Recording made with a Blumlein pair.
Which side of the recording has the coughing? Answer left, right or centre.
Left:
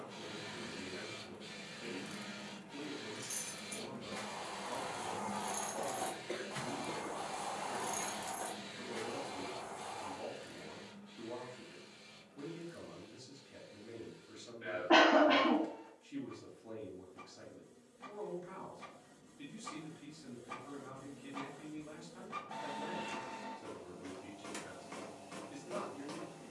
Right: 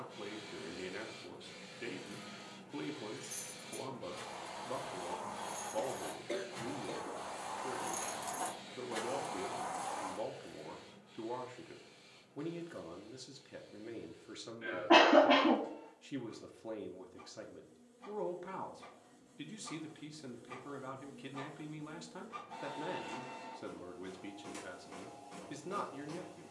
centre.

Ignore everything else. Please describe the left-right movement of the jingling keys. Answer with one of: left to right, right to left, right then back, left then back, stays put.
left to right.